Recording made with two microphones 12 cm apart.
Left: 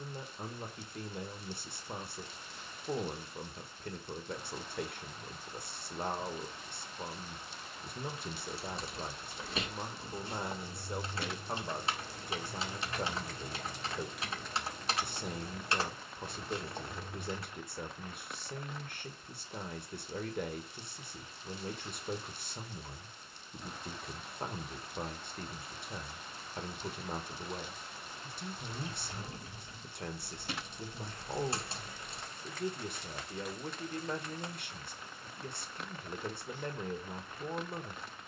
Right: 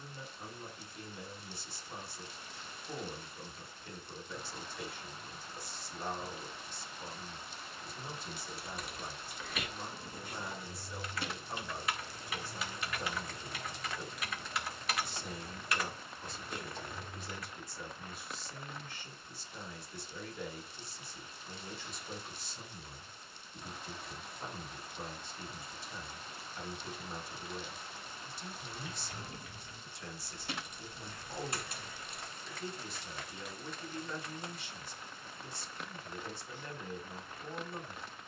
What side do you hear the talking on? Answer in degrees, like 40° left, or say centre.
60° left.